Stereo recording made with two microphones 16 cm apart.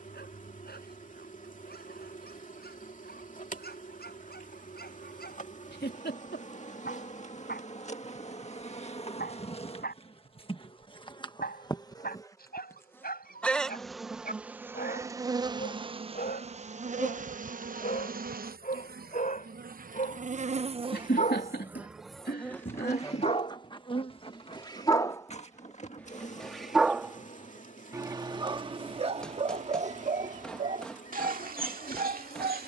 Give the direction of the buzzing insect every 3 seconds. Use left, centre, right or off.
left, left, left, left, centre, right, right, centre, left, left, left.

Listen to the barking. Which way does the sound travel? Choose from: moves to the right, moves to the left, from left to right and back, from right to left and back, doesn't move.
moves to the right.